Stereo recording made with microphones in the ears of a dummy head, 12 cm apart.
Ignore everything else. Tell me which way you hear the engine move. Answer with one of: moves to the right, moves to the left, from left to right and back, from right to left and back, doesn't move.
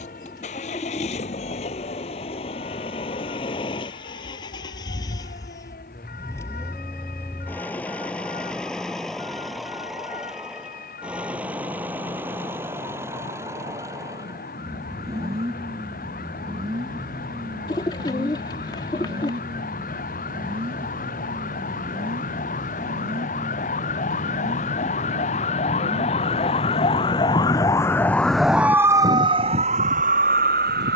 moves to the right.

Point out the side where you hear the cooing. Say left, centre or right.
left.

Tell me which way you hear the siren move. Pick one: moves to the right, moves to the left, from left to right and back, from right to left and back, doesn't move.
moves to the right.